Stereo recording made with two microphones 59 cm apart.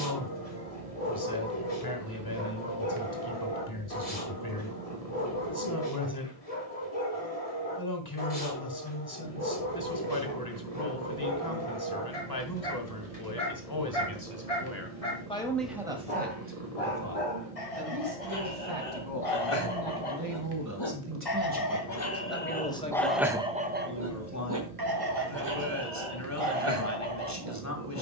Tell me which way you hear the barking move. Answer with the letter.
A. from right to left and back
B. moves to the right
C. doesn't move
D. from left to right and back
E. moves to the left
B.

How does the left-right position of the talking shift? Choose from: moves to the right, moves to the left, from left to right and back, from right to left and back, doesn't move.
from left to right and back.